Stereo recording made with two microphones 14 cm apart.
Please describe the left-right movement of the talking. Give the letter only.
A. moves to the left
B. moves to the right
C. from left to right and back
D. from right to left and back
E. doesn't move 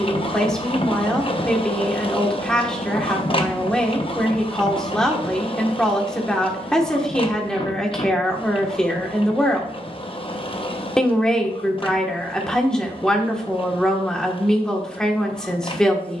E.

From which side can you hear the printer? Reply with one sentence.
You can hear the printer on the left.